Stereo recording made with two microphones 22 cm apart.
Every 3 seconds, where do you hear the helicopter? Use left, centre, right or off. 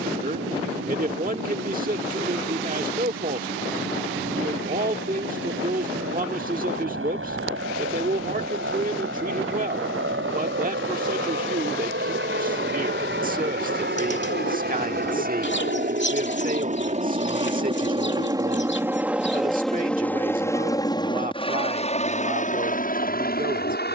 right, right, right, right, right, right, centre, left.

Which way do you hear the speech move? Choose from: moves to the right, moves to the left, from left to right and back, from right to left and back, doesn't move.
doesn't move.